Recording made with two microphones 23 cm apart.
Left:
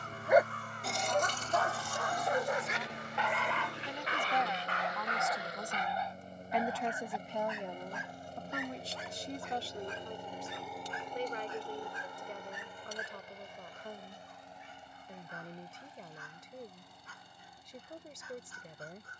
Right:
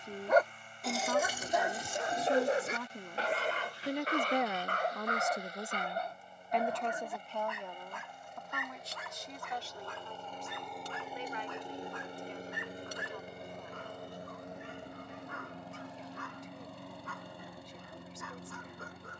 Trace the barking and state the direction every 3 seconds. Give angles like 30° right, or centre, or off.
10° right, 50° right, 60° right, 70° right, 70° right, 70° right, 70° right.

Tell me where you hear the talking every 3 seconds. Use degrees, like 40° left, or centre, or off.
80° right, 40° right, 20° left, 40° left, 50° left, 50° left, 50° left.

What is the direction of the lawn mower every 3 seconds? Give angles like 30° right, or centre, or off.
40° left, 40° left, 40° left, 10° left, 50° right, 80° right, 80° right.